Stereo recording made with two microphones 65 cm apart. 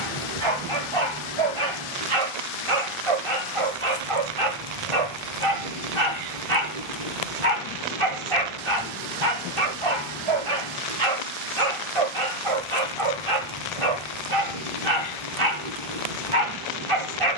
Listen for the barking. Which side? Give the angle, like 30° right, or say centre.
50° right.